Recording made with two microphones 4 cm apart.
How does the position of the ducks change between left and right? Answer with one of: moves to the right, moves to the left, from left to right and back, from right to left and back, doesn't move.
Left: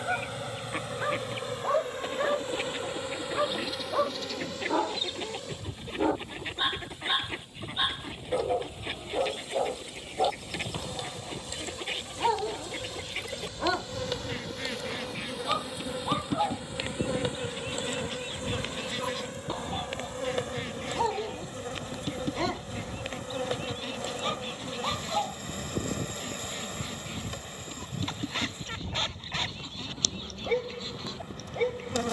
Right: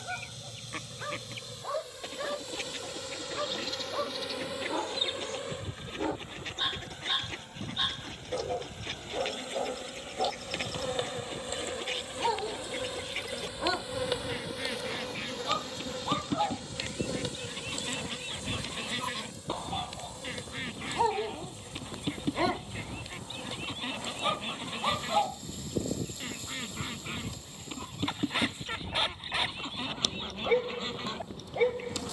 moves to the right.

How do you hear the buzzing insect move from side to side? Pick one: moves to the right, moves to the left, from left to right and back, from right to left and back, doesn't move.
from left to right and back.